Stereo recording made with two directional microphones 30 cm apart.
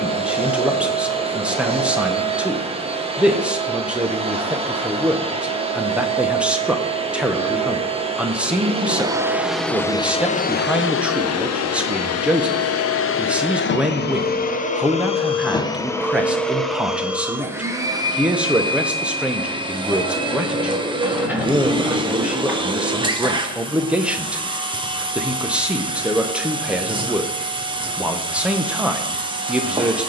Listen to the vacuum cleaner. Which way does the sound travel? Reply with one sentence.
You can hear the vacuum cleaner go left and come back.